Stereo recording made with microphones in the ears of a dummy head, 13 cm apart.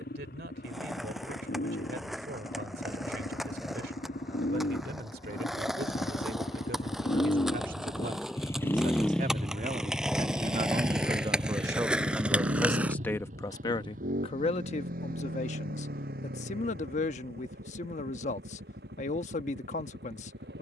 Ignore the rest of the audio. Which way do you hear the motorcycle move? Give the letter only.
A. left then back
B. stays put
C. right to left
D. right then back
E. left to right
E.